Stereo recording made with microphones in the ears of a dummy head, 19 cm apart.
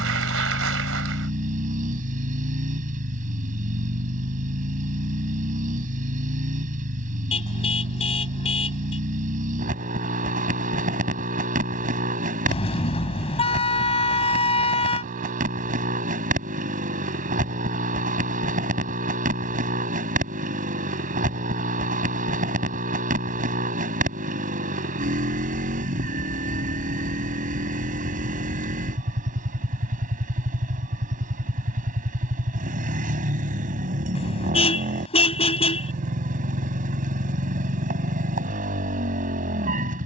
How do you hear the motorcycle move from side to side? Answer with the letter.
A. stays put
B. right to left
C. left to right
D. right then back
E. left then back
A.